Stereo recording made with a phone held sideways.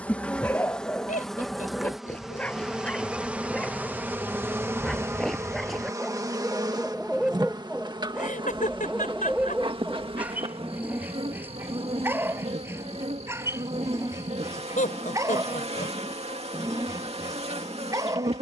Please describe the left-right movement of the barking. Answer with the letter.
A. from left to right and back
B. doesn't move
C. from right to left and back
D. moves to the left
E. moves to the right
E.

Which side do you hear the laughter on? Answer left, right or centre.
left.